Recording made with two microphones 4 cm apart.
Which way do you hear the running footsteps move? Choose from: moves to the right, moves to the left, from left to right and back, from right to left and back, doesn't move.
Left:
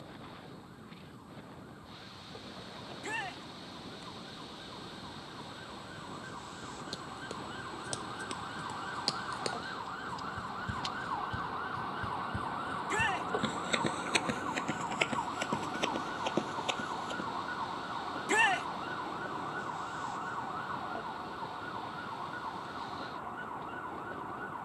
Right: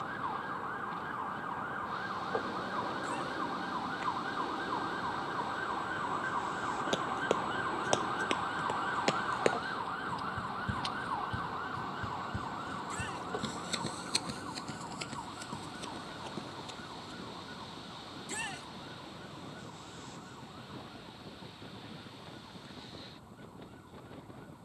moves to the left.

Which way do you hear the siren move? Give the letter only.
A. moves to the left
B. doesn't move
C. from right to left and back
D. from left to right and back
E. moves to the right
A.